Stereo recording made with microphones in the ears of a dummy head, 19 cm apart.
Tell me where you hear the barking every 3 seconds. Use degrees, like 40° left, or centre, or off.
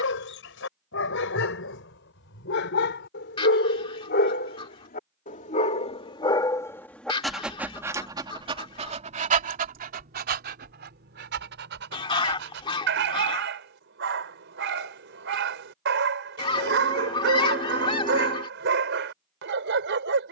70° left, 50° left, 10° right, 50° right, 60° right, 60° right, 60° right.